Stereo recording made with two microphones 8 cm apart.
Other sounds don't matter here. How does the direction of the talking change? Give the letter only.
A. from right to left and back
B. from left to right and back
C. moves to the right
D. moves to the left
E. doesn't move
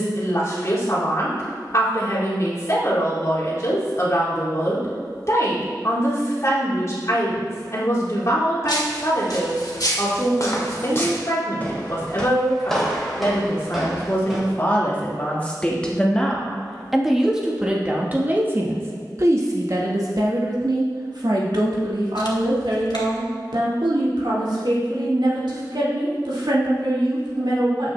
C.